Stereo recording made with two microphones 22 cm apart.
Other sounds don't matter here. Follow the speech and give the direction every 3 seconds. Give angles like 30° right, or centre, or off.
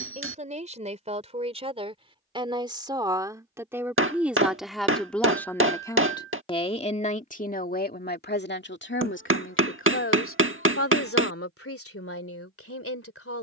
30° right, centre, 40° left, 70° left, 80° left.